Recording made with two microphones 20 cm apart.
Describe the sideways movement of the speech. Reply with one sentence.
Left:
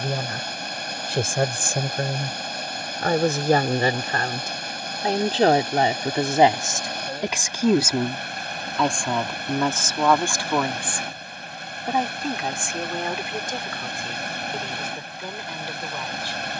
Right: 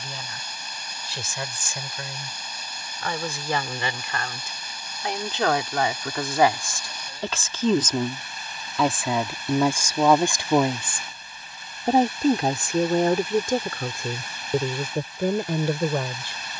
In this clip you hear the speech travel towards the right.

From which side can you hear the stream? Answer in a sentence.
In this clip you hear the stream on the left.